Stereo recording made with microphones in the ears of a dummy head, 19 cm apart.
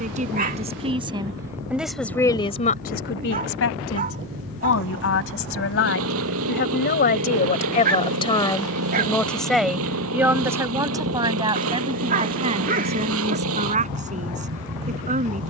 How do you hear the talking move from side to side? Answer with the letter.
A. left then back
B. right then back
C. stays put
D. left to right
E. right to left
A.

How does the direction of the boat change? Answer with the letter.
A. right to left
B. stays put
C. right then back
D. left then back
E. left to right
B.